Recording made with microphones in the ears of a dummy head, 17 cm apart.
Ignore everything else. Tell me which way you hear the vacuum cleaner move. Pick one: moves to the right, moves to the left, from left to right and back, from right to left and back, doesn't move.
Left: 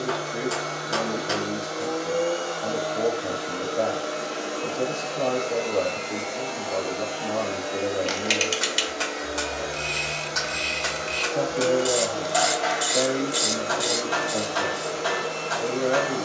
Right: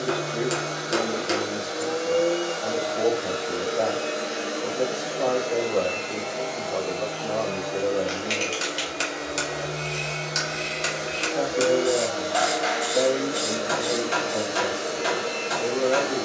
from right to left and back.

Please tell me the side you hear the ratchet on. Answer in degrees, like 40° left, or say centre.
60° left.